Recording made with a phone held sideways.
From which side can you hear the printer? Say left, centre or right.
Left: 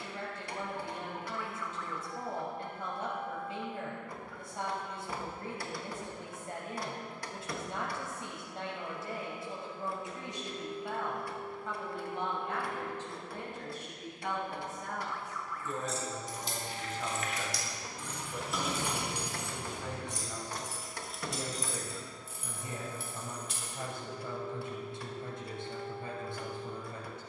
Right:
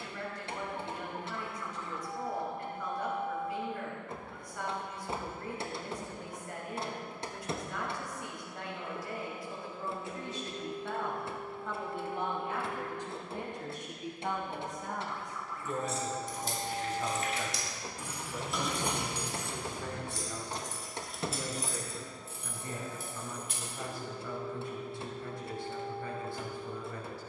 right.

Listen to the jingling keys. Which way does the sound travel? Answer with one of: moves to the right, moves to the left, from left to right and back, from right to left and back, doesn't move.
from right to left and back.